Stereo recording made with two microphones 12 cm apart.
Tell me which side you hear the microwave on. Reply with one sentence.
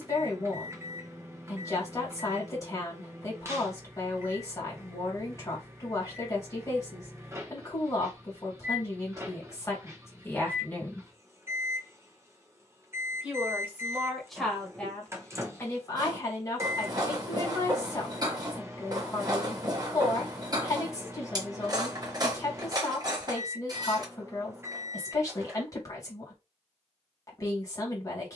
In this clip you hear the microwave on the right.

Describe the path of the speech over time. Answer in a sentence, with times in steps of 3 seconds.
You can hear the speech on the left from 0 s, in the centre from 12 s and on the left from 15 s.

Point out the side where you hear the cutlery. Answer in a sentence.
You can hear the cutlery on the right.